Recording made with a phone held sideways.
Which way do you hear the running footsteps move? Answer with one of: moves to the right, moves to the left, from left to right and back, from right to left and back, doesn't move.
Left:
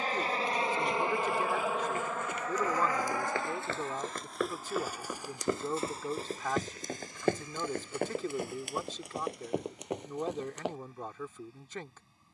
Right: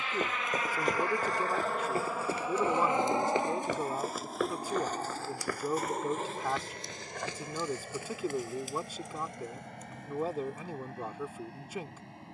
moves to the left.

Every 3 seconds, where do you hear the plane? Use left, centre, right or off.
centre, right, right, right.